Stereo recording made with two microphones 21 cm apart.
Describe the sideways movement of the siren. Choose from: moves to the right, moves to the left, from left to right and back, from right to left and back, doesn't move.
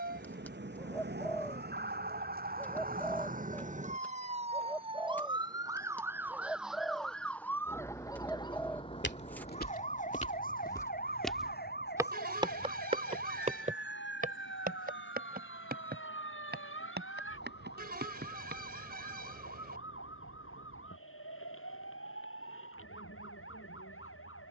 moves to the left.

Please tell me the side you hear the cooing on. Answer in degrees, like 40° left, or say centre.
10° left.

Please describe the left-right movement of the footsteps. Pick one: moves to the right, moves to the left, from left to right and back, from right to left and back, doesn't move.
moves to the right.